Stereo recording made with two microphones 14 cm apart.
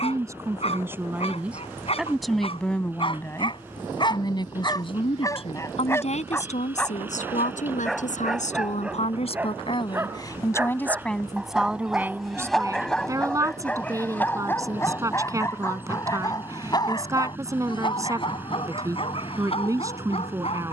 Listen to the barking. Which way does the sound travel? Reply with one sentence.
You can hear the barking move from left to right and back again.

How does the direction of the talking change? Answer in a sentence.
You can hear the talking go left and come back.